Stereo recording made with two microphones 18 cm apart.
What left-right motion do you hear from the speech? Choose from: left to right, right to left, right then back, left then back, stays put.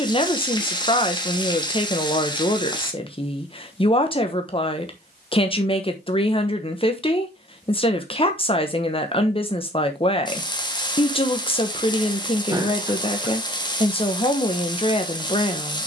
stays put.